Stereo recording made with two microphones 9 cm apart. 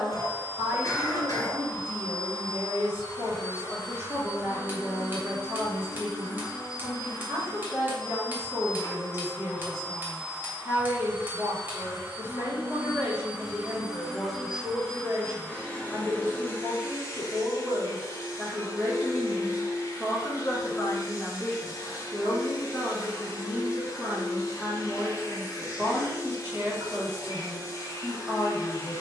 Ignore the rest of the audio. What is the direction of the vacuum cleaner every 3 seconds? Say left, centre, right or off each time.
left, left, left, centre, centre, left, left, left, left, left.